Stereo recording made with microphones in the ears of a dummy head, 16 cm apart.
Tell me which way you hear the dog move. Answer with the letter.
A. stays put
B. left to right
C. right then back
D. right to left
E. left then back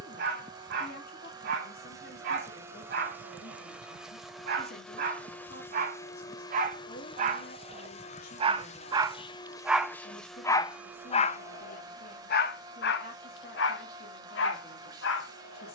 D.